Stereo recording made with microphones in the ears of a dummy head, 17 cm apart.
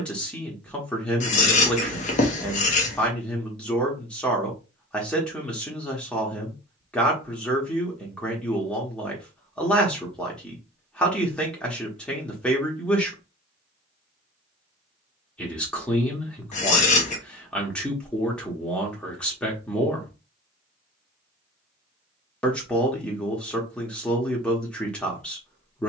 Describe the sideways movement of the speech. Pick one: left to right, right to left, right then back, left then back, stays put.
stays put.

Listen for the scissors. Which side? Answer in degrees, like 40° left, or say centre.
40° left.